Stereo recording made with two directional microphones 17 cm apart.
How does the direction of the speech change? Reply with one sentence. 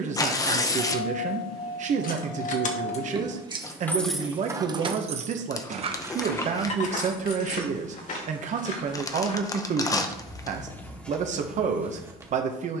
You can hear the speech stay in one place.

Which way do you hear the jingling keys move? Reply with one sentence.
You can hear the jingling keys move from left to right and back again.